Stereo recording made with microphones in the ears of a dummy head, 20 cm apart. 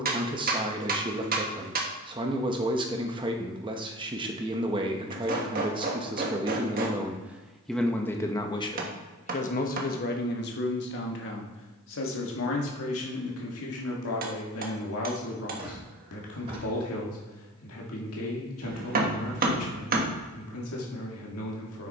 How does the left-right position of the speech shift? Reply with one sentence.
You can hear the speech move to the left.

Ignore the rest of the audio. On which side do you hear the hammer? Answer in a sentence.
In this clip you hear the hammer on the right.